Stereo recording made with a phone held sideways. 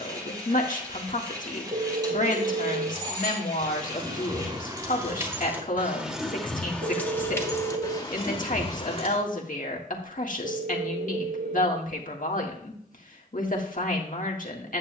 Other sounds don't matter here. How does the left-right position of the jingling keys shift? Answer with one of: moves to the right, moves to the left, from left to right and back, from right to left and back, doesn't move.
moves to the left.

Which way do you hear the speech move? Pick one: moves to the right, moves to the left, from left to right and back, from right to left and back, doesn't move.
doesn't move.